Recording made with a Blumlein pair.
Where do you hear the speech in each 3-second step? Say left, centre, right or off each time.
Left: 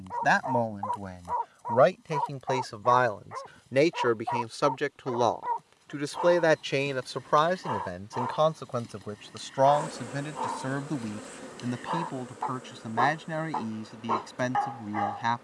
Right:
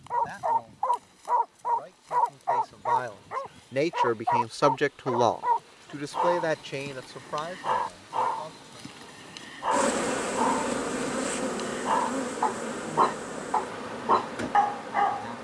left, centre, left, left, left.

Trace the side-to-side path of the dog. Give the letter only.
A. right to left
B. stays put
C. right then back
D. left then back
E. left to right
B.